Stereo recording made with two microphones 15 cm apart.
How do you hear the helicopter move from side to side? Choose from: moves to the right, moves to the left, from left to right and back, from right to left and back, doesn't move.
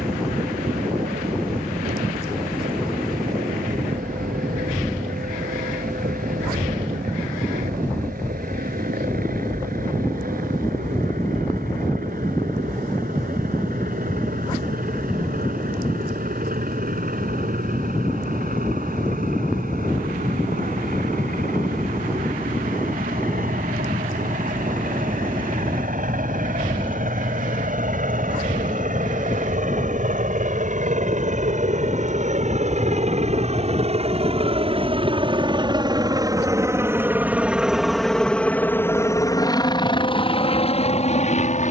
moves to the left.